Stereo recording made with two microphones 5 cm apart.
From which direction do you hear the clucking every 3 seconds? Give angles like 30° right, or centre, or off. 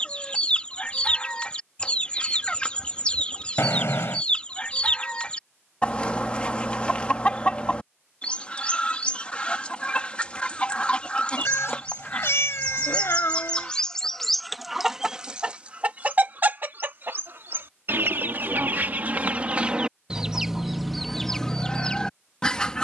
20° left, 20° left, 20° left, 20° left, 10° left, 40° right, 30° right, 10° left.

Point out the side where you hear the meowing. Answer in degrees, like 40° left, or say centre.
70° left.